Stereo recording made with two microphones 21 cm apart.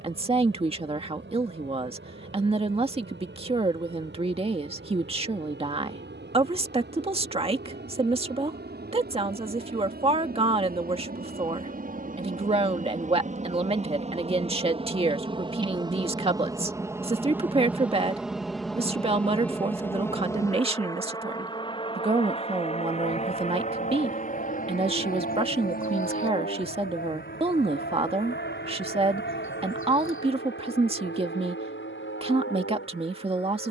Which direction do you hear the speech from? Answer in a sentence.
In this clip you hear the speech on the right.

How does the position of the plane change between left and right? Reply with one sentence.
In this clip you hear the plane travel towards the left.